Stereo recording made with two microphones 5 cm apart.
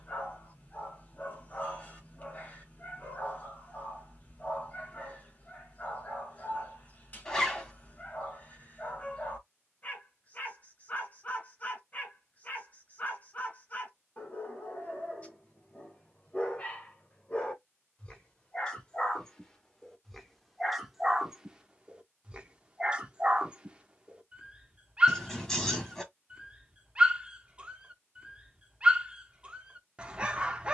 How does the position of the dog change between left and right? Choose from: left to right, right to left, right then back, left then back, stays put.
left to right.